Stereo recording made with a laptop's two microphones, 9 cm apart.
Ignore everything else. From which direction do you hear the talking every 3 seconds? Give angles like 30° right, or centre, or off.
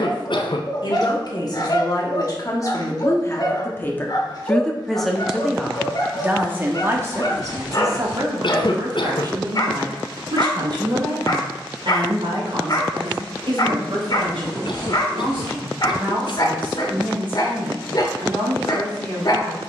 50° left, 10° left, 30° right, 60° right, 70° right, 70° right, 80° right.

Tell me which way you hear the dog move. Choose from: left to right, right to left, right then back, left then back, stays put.
stays put.